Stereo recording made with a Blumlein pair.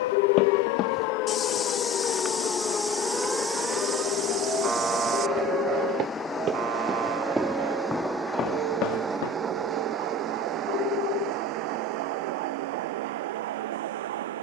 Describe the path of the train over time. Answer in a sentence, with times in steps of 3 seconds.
In this clip you hear the train on the left from 0 s, in the centre from 6 s and on the right from 9 s.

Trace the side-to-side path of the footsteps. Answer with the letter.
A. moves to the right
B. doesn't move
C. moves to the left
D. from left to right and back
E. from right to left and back
D.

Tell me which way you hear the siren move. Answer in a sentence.
You can hear the siren travel towards the right.